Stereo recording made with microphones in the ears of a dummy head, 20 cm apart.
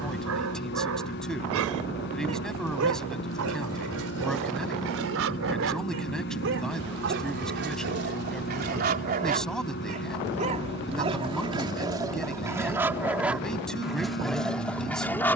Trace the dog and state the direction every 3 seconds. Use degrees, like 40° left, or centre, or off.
70° right, 70° right, 50° right, 30° right, centre.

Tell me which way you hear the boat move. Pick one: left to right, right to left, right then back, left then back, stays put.
stays put.